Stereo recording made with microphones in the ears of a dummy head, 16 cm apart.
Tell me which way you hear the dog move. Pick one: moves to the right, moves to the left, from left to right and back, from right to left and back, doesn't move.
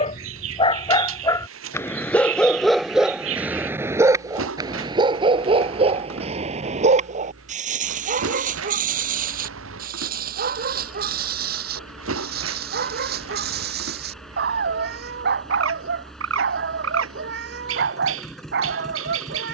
moves to the right.